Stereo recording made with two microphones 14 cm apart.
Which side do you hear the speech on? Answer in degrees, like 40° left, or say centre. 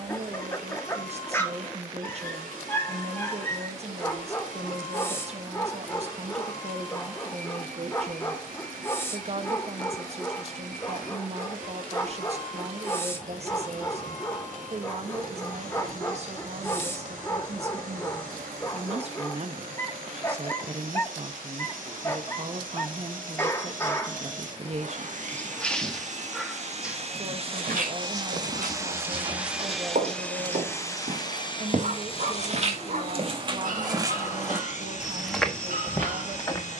50° right.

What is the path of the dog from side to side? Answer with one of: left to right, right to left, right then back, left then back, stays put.
left to right.